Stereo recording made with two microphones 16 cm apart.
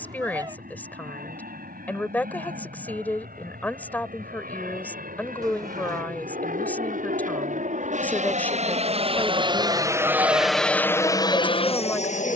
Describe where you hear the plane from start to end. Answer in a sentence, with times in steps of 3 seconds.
You can hear the plane on the right from 0 s and in the centre from 9 s.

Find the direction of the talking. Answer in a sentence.
In this clip you hear the talking in the centre.